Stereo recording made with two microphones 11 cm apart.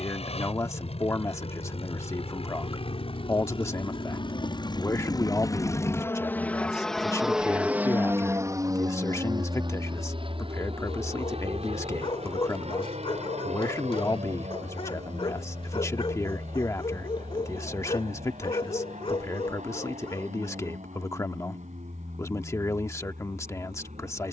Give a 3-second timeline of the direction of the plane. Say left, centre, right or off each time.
left, left, centre, right, right, right, right, right.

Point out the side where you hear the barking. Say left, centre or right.
left.